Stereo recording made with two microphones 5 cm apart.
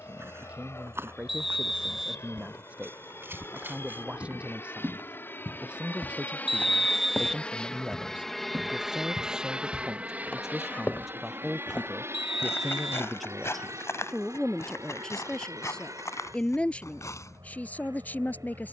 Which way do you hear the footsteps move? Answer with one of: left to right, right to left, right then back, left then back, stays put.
right to left.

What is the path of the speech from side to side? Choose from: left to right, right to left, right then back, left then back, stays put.
right to left.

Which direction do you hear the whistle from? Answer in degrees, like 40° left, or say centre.
centre.